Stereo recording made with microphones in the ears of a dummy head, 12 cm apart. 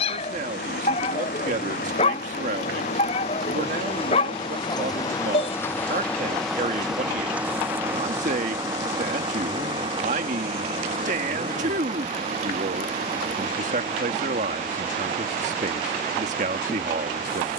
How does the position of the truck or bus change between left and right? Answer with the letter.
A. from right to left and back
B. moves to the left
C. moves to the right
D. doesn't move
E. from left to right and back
C.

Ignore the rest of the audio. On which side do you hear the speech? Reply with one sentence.
In this clip you hear the speech on the right.